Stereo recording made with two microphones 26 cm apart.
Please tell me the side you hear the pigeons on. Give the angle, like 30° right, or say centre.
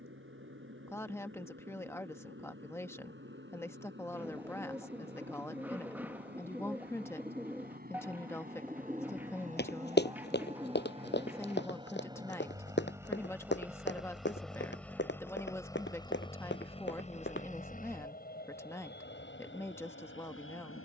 10° right.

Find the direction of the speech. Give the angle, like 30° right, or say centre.
10° left.